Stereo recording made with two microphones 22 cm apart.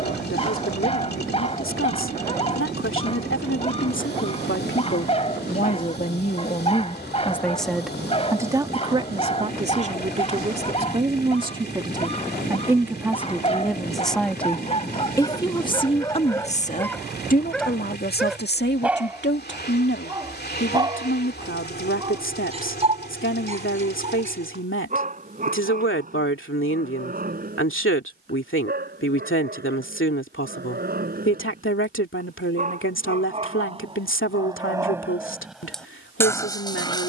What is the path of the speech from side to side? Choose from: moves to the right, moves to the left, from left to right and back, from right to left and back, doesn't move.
from left to right and back.